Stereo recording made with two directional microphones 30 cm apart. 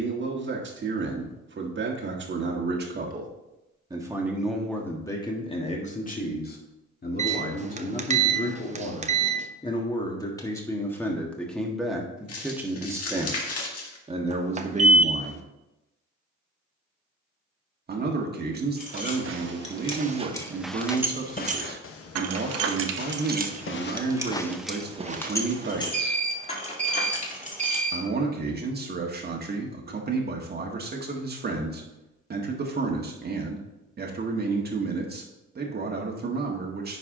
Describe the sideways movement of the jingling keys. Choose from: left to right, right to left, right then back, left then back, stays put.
right then back.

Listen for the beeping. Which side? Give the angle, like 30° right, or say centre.
20° right.